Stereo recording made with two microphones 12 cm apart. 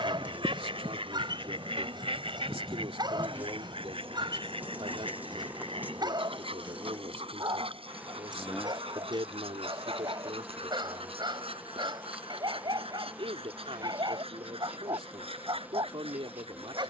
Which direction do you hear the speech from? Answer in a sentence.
In this clip you hear the speech on the right.